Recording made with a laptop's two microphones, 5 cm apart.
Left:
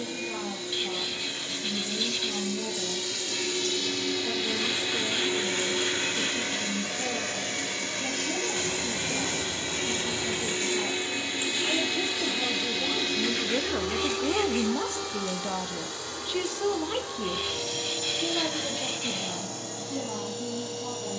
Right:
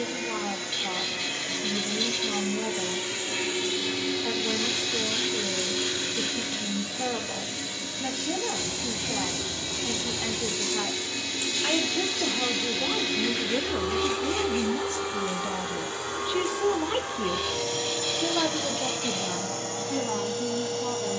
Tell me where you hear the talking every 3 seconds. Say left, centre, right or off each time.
right, right, right, right, centre, centre, right.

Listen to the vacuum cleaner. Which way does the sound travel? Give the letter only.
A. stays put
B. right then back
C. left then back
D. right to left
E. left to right
C.